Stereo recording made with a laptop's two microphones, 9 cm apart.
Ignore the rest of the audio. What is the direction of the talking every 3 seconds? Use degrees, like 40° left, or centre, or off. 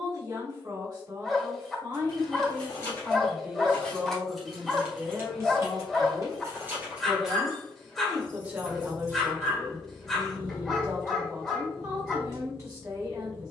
40° right, centre, 10° right, 30° right, 30° right.